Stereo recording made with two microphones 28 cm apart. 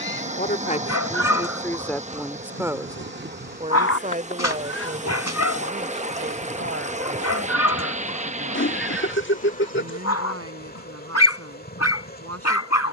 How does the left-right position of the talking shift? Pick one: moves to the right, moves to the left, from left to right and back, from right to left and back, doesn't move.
moves to the right.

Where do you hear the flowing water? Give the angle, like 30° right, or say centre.
20° right.